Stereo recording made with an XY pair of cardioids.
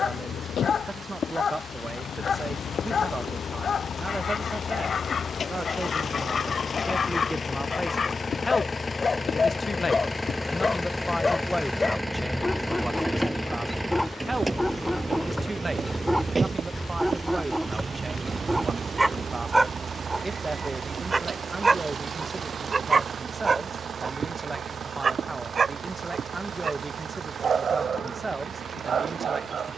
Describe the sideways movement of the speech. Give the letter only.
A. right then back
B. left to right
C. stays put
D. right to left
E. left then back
E.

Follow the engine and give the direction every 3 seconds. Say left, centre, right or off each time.
left, left, left, centre, centre, right, right, right, right, right.